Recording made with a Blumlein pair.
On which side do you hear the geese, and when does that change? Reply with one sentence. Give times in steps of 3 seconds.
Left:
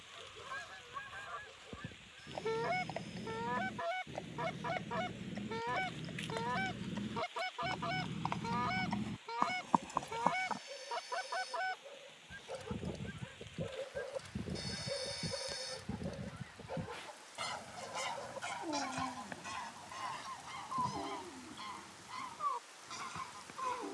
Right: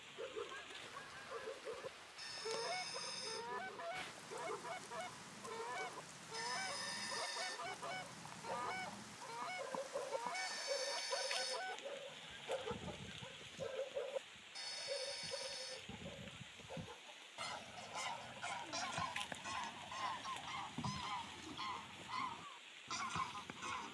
You can hear the geese on the left from 0 s and in the centre from 18 s.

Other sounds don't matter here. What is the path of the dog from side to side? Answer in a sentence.
You can hear the dog move from right to left.